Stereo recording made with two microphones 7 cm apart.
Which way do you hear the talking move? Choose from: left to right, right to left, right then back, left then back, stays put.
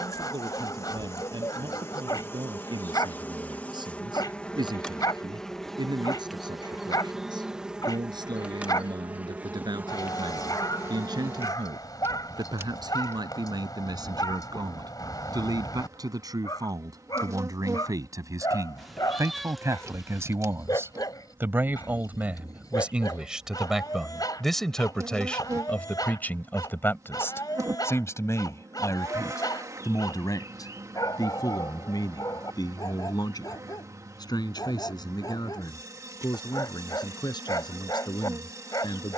right to left.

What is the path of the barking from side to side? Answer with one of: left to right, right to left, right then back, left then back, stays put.
stays put.